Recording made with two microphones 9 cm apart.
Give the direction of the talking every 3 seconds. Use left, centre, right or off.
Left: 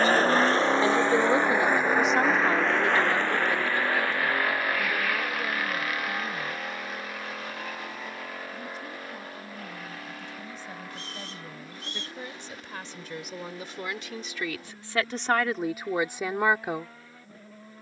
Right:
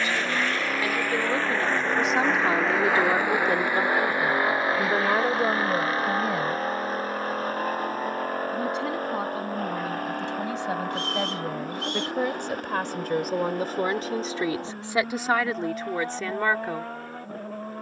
centre, right, right, right, right, centre.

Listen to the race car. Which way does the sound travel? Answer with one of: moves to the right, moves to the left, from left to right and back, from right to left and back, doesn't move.
moves to the right.